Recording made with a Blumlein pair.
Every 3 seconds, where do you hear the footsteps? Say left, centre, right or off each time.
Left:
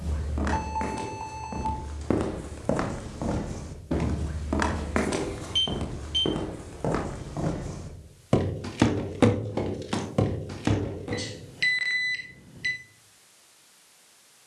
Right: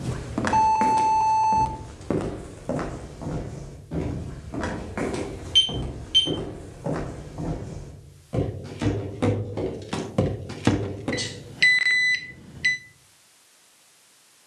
centre, left, left, centre, off.